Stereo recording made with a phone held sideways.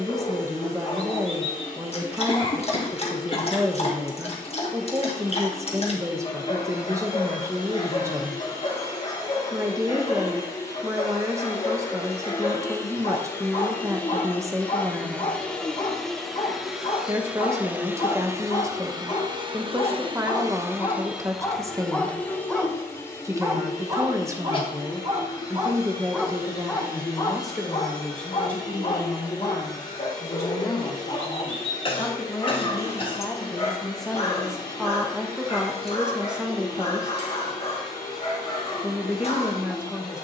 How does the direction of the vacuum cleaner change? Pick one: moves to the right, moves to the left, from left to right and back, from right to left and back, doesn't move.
from left to right and back.